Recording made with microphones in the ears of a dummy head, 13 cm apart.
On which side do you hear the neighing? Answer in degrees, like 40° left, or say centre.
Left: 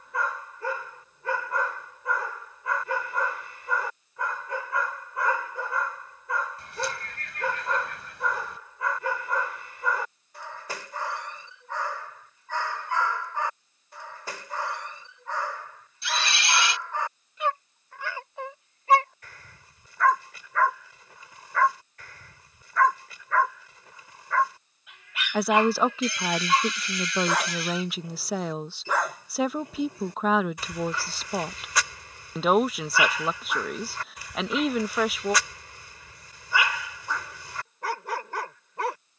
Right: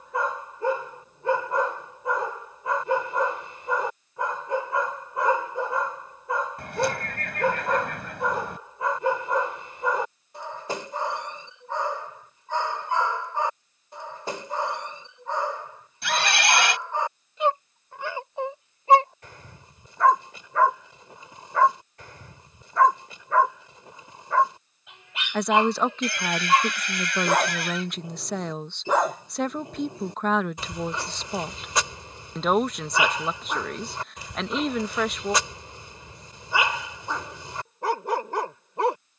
50° right.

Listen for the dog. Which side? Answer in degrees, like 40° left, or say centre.
20° right.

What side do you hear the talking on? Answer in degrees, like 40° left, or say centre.
centre.